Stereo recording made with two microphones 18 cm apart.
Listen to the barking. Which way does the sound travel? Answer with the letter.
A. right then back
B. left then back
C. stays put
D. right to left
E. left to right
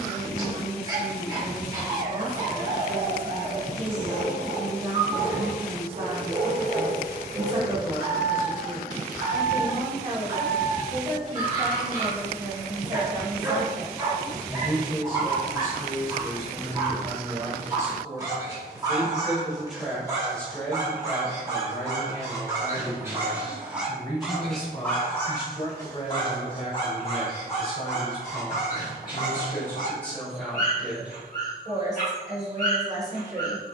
D.